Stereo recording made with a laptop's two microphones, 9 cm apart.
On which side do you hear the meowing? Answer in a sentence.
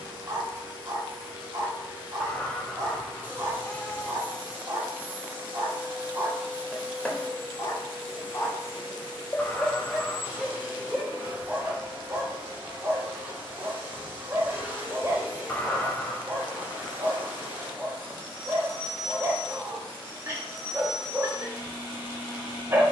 You can hear the meowing in the centre.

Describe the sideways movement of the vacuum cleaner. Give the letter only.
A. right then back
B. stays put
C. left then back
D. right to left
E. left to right
B.